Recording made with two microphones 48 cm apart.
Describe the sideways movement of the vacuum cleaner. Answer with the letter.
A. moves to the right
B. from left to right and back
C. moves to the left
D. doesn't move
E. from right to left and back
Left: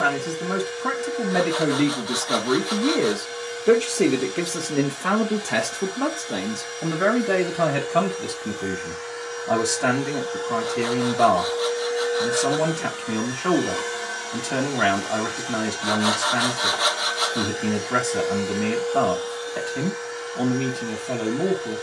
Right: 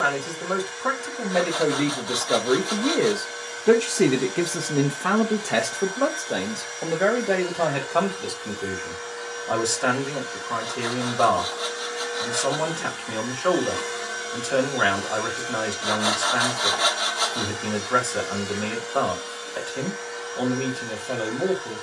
E.